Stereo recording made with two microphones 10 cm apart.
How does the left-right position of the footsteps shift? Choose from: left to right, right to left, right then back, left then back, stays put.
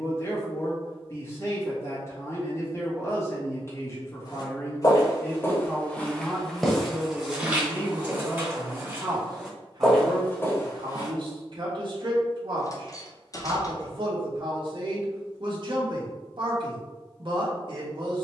right then back.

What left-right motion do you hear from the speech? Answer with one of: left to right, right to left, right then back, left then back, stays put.
left to right.